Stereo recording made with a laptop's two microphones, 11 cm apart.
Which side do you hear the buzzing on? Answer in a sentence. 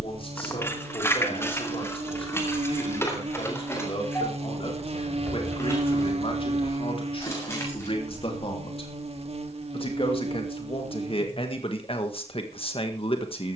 In this clip you hear the buzzing on the right.